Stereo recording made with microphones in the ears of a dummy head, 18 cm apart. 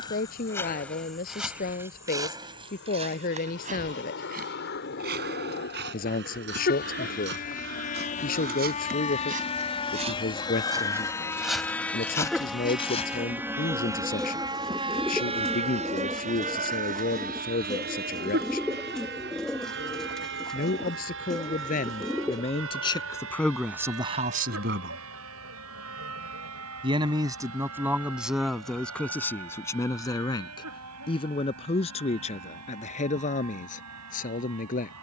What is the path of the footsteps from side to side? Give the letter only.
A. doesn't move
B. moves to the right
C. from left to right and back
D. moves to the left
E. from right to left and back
C.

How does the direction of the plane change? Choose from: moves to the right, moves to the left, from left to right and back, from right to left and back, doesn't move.
moves to the right.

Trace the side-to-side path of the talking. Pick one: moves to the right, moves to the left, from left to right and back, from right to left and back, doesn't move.
from left to right and back.